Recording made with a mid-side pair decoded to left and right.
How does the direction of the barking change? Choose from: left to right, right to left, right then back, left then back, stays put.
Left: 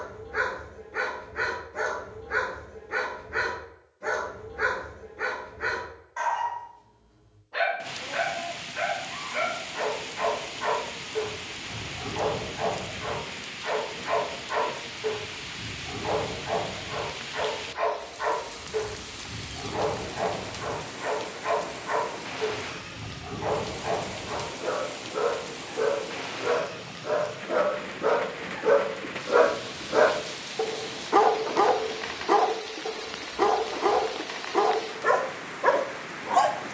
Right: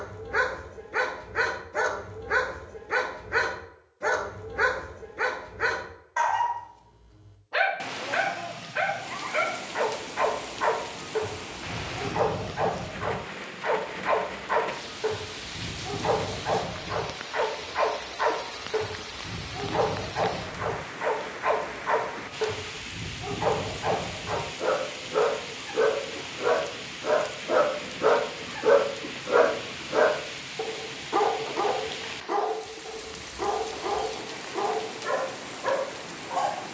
right to left.